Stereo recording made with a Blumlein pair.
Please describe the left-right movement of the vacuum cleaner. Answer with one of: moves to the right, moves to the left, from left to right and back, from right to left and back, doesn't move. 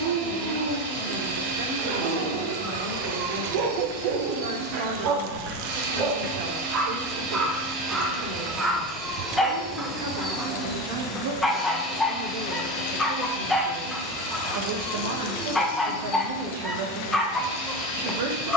moves to the left.